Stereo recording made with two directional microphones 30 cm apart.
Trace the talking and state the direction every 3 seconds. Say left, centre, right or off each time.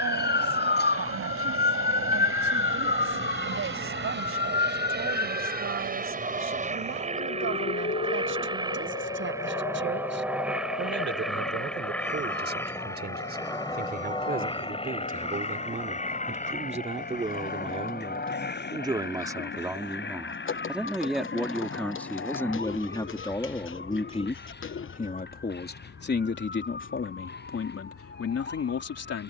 right, right, right, right, right, right, centre, centre, left, left.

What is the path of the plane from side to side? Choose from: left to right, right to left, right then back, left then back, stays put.
right to left.